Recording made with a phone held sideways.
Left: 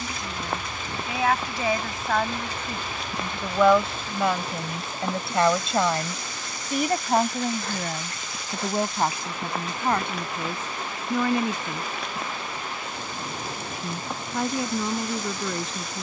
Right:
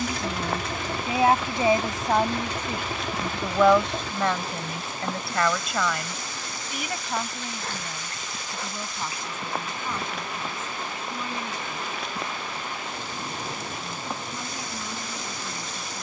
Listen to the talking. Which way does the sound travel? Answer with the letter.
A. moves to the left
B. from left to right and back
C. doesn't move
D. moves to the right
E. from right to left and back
A.